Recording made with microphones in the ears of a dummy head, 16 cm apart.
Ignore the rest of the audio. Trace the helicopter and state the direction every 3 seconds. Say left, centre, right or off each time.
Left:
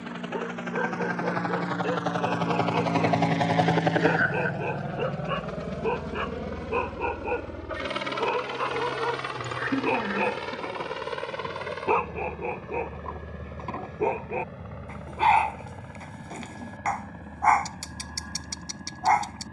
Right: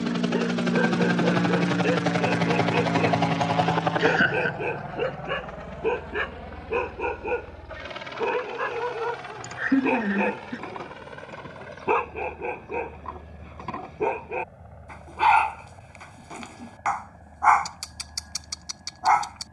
right, left, left, left, left, left, left.